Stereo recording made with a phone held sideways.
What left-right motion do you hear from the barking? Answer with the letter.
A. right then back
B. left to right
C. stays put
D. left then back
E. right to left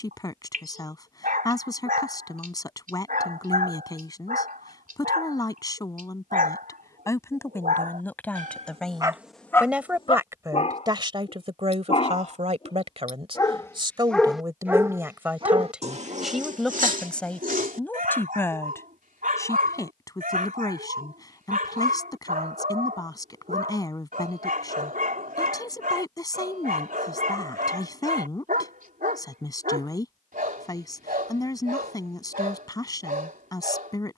D.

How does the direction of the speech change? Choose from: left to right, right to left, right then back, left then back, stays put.
right then back.